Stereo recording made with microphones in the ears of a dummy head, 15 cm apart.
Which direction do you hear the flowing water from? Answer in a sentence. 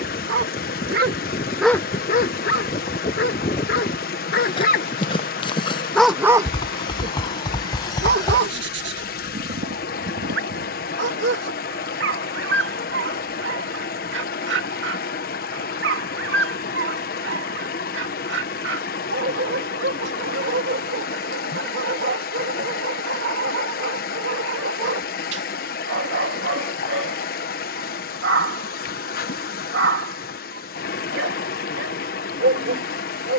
In this clip you hear the flowing water on the left.